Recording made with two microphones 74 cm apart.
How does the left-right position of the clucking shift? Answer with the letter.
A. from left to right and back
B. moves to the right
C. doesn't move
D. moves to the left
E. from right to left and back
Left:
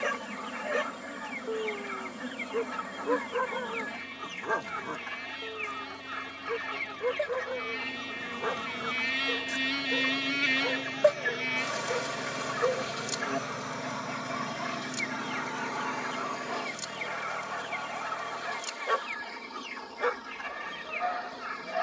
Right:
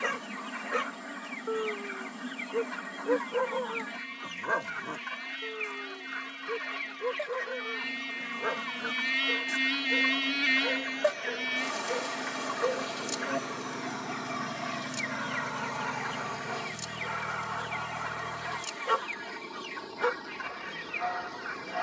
C.